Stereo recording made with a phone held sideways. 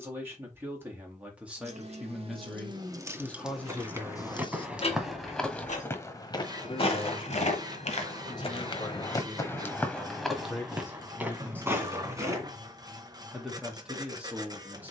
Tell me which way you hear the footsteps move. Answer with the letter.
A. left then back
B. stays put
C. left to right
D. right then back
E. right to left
A.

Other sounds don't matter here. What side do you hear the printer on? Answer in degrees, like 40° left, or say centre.
30° right.